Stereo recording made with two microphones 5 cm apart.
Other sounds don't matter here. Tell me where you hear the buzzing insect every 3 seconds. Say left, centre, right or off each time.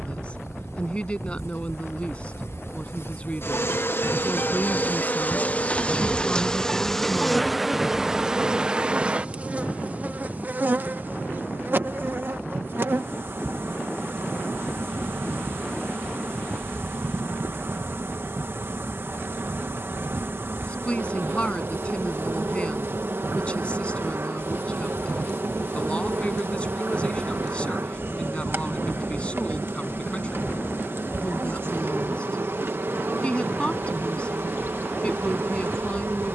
left, left, centre, right, right, right, right, right, right, right, right, right.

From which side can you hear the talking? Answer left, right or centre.
left.